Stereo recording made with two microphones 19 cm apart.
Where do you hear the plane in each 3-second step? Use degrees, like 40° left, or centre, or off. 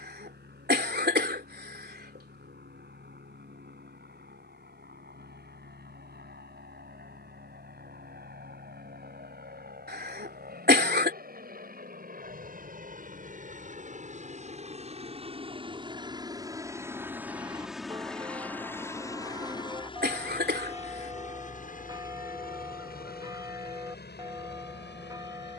80° right, 70° right, 70° right, 60° right, 50° right, 20° right, 20° left, 50° left, 60° left.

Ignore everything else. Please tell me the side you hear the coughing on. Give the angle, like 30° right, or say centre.
60° right.